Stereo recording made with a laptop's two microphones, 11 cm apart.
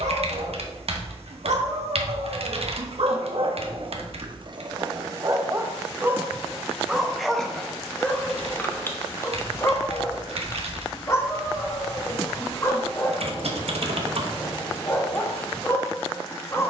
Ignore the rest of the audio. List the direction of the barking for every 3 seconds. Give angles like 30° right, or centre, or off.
70° right, 40° right, centre, 30° left, 30° left, 30° left.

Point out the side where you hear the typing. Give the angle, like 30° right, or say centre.
60° right.